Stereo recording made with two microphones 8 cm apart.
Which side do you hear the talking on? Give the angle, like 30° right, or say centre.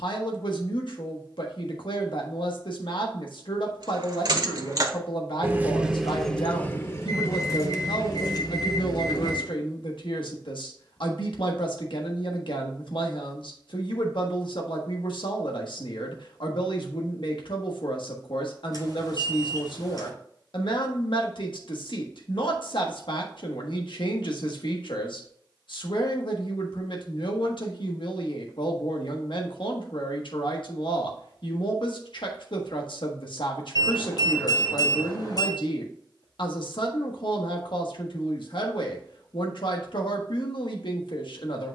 70° left.